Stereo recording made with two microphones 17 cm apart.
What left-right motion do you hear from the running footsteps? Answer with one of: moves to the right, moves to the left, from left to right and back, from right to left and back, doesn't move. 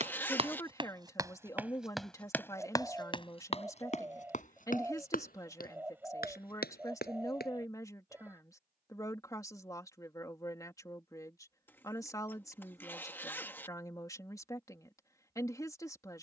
moves to the left.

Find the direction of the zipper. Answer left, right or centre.
centre.